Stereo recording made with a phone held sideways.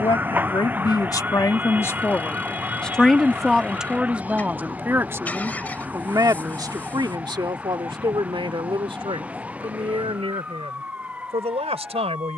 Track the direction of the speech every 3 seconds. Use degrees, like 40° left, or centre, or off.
20° left, 10° right, 40° right, 50° right.